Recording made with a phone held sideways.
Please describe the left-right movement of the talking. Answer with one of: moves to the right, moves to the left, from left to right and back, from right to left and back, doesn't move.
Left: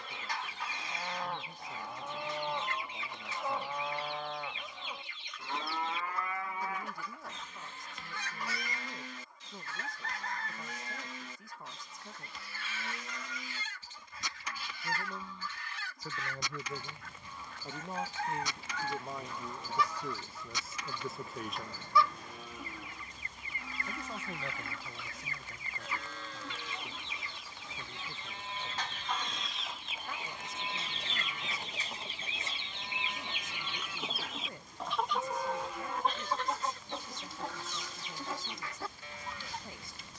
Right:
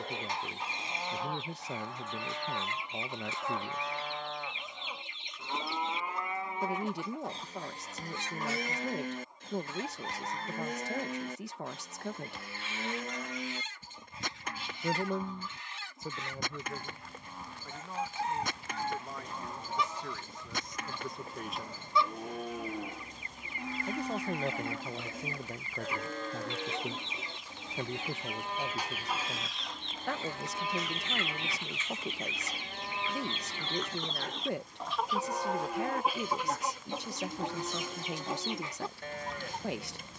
from right to left and back.